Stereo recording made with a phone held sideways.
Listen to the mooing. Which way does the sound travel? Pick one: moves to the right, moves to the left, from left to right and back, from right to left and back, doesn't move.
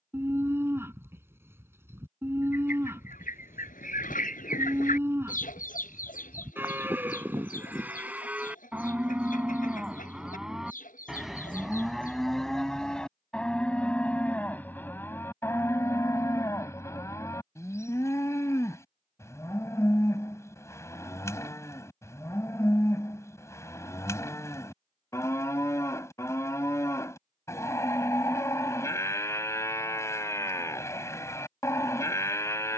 moves to the left.